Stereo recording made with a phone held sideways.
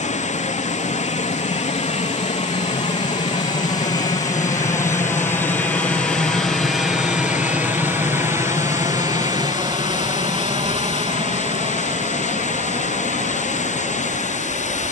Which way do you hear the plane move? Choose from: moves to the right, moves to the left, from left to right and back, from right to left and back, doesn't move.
moves to the right.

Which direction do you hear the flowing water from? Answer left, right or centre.
left.